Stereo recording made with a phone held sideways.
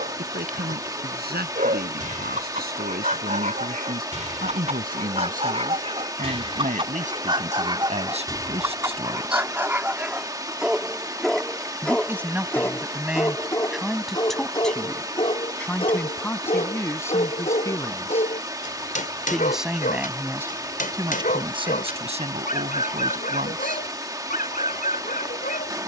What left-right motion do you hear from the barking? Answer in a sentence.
In this clip you hear the barking travel towards the left.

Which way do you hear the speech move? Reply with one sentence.
You can hear the speech go left and come back.